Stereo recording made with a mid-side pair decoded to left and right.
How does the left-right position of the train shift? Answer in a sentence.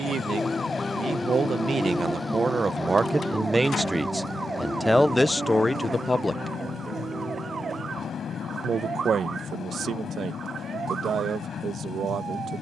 You can hear the train stay in one place.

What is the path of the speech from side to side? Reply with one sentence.
In this clip you hear the speech go left and come back.